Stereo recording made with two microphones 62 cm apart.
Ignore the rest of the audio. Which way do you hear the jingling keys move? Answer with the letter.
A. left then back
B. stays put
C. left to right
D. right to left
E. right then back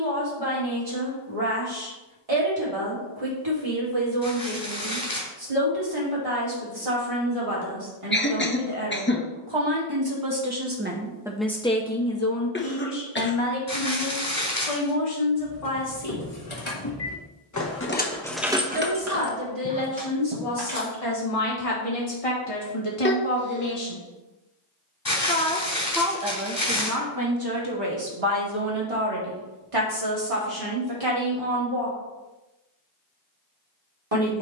C.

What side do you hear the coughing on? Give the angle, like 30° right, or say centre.
20° left.